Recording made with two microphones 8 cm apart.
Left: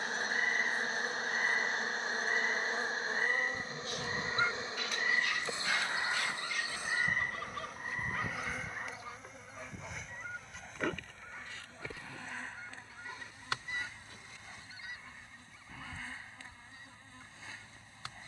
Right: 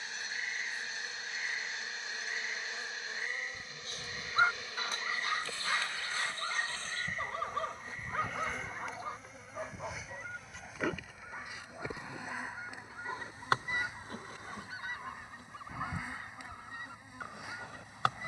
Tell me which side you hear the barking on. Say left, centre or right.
right.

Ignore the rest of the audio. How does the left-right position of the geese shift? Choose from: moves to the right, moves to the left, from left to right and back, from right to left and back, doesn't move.
moves to the right.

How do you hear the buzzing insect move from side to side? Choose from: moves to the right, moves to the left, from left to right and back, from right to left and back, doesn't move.
moves to the right.